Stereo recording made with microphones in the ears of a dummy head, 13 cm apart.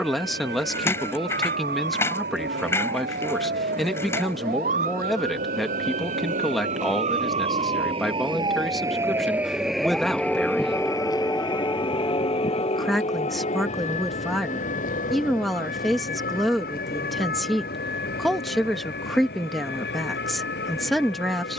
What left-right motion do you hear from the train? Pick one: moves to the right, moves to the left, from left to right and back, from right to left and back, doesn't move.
moves to the left.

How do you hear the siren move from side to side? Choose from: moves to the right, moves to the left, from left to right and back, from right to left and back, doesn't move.
moves to the left.